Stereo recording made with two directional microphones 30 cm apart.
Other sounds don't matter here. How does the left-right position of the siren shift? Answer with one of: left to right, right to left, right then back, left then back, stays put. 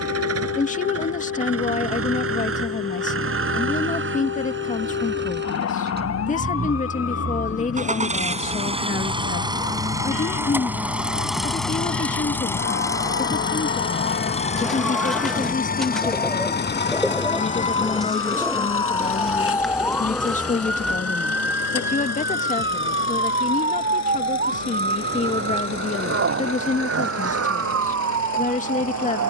left to right.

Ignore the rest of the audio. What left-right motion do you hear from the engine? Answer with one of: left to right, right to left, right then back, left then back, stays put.
right to left.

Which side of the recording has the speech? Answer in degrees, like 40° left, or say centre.
20° left.